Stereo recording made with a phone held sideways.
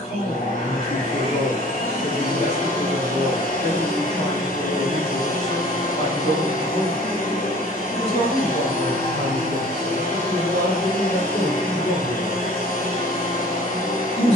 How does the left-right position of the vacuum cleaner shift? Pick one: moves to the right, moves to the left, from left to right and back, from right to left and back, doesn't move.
doesn't move.